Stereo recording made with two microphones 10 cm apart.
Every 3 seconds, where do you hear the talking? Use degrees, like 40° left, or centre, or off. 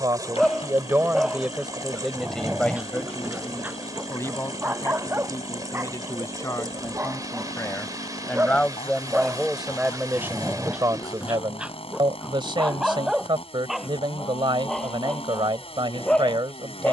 10° right, 30° left, 20° left, 20° right, 60° right, 60° right.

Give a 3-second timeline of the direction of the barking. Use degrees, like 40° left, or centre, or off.
10° right, 20° right, 20° right, 10° right, centre, 10° left.